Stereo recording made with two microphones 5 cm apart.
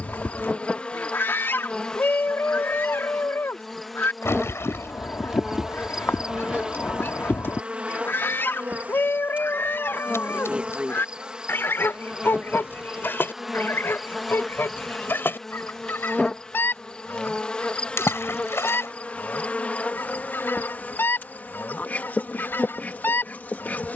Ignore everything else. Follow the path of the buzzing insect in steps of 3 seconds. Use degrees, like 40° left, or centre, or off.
20° left, centre, 20° right, 20° right, centre, 10° left, 30° left, 40° left.